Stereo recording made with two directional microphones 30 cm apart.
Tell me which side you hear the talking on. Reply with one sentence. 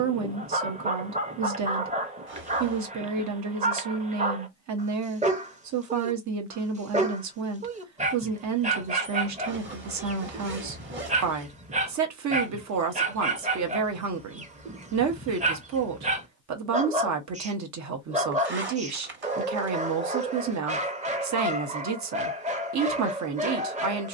You can hear the talking on the right.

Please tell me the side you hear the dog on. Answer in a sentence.
In this clip you hear the dog on the right.